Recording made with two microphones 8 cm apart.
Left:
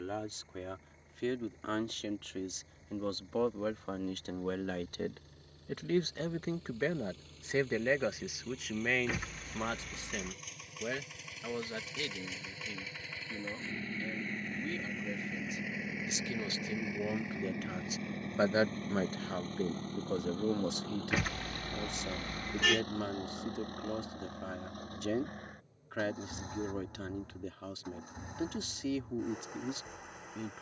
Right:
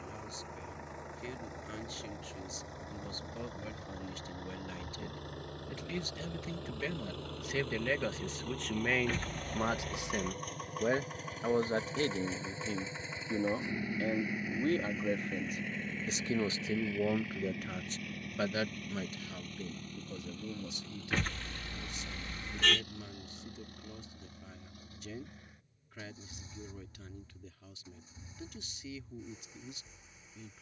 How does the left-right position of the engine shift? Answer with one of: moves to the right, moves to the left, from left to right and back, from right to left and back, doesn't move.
moves to the left.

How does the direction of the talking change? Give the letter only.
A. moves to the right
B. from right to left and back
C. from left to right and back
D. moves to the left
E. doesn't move
C.